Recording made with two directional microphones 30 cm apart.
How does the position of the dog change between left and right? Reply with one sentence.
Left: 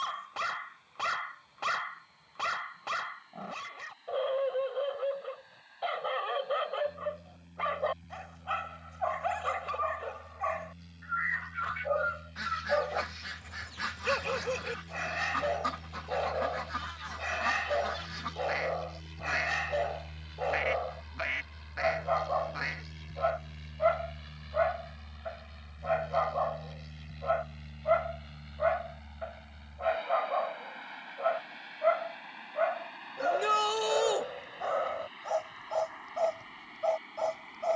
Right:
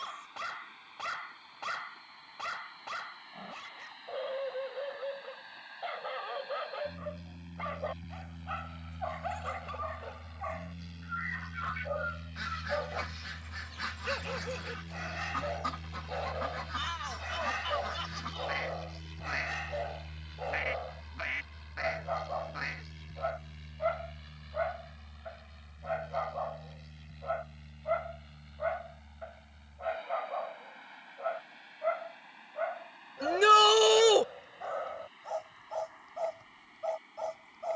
In this clip you hear the dog stay put.